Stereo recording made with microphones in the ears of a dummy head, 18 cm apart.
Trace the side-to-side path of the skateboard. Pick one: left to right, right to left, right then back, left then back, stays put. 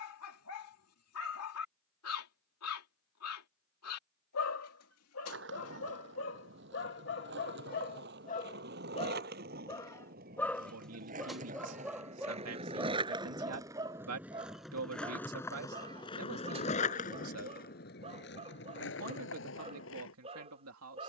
right to left.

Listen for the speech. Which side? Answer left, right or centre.
right.